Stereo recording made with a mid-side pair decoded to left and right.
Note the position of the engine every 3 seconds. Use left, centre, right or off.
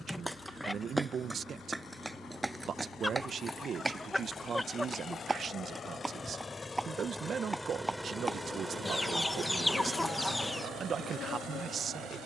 left, left, centre, right.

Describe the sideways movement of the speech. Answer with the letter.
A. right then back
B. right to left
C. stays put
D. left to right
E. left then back
C.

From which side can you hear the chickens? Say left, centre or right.
centre.